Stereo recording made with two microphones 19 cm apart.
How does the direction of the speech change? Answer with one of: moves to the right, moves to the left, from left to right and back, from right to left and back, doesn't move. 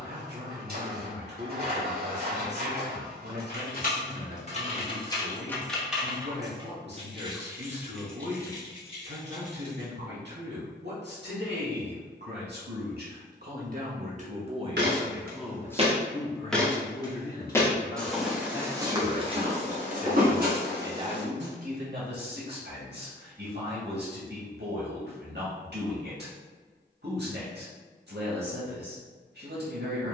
from right to left and back.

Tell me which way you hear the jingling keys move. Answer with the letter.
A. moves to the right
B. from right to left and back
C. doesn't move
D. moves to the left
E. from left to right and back
E.